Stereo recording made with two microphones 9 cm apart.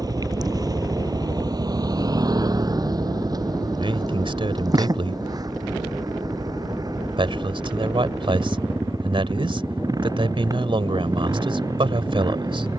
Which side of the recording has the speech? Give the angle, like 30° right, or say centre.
70° right.